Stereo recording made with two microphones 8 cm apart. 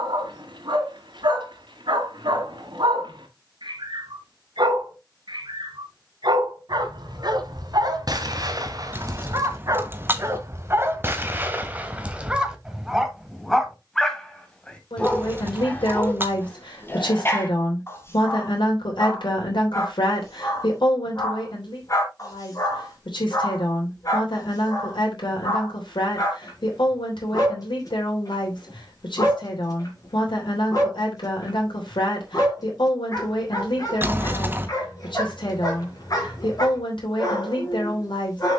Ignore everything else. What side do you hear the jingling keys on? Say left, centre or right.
right.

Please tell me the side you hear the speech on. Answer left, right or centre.
left.